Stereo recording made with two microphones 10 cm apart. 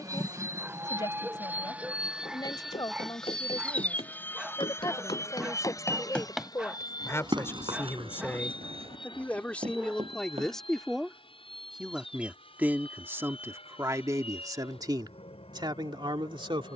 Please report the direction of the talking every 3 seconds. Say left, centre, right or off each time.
left, left, left, centre, right, right.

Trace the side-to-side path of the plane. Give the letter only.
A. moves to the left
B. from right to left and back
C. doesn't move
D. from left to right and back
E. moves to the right
A.